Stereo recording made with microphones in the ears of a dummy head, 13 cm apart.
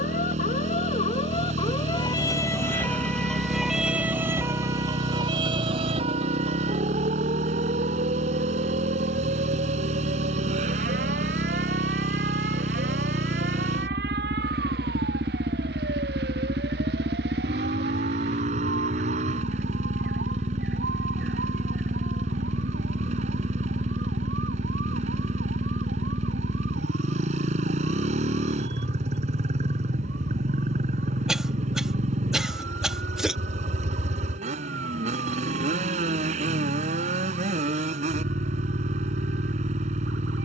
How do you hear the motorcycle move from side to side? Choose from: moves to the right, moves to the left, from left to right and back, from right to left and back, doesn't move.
doesn't move.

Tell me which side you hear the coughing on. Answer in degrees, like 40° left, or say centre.
centre.